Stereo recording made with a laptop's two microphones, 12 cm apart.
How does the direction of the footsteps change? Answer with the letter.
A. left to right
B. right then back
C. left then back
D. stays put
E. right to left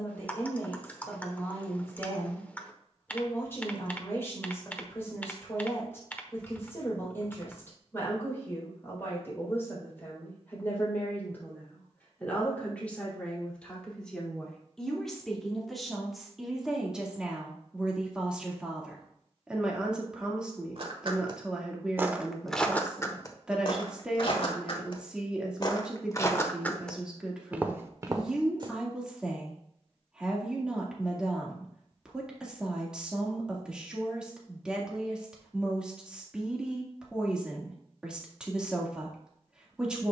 C.